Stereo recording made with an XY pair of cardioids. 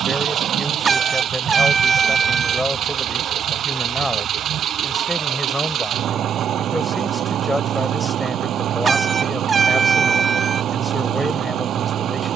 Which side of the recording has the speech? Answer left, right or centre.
centre.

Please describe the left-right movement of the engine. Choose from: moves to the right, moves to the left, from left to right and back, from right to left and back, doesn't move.
doesn't move.